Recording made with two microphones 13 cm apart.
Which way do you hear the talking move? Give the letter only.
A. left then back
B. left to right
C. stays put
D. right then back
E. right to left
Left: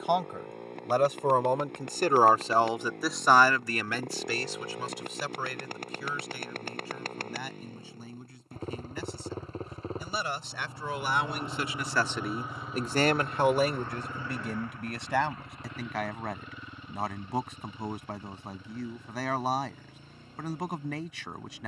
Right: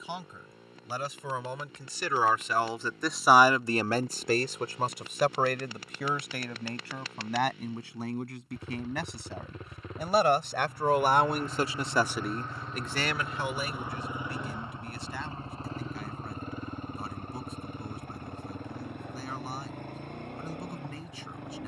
D.